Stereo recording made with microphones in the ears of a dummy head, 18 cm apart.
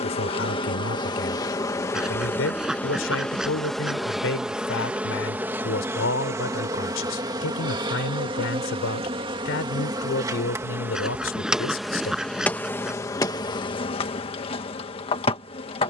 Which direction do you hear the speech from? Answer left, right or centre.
left.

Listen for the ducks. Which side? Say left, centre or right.
centre.